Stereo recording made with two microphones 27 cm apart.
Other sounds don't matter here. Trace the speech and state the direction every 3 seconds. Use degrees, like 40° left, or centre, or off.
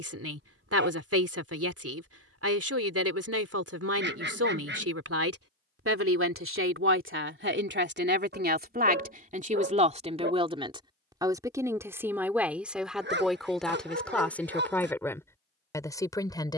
70° right, 70° right, 50° right, 20° right, centre, 10° left.